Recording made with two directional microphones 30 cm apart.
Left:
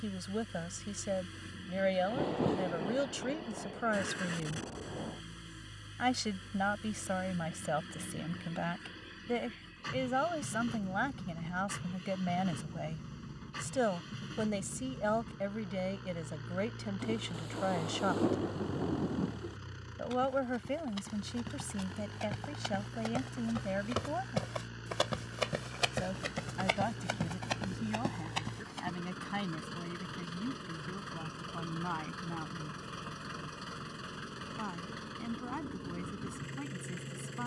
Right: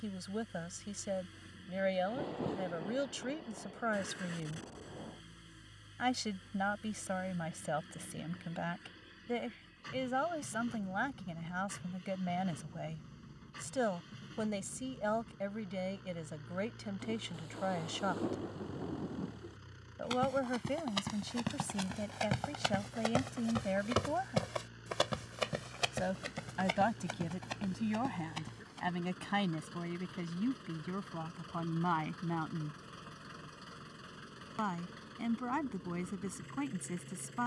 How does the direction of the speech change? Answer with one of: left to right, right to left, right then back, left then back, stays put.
left to right.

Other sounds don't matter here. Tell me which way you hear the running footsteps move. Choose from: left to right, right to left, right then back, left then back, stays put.
right to left.